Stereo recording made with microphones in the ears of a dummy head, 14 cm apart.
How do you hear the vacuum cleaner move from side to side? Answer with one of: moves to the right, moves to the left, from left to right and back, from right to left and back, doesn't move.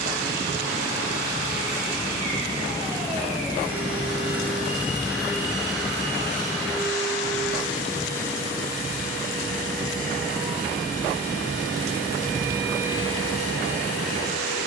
moves to the left.